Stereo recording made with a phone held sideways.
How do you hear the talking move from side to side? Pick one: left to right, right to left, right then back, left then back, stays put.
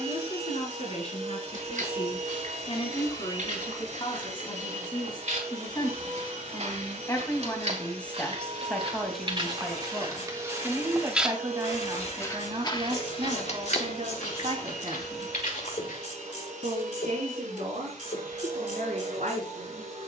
left to right.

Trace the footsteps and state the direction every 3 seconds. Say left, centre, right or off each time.
right, right, right, right, left, left, off.